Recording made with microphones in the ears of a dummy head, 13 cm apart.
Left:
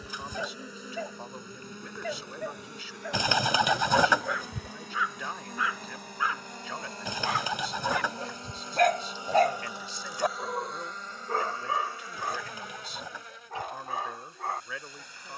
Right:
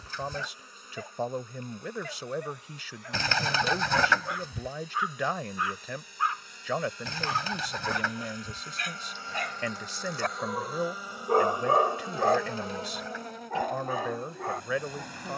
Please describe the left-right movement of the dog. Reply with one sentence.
In this clip you hear the dog travel towards the right.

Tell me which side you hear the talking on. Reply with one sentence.
In this clip you hear the talking on the right.